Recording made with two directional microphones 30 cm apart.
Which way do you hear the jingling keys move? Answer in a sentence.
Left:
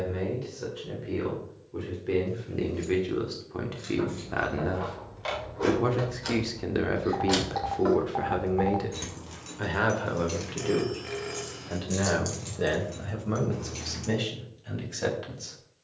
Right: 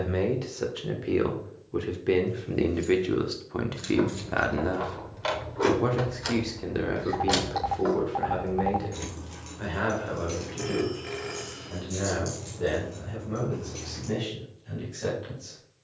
In this clip you hear the jingling keys go from the right side to the left.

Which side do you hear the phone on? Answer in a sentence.
You can hear the phone in the centre.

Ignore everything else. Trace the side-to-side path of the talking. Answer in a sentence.
In this clip you hear the talking go from the right side to the left.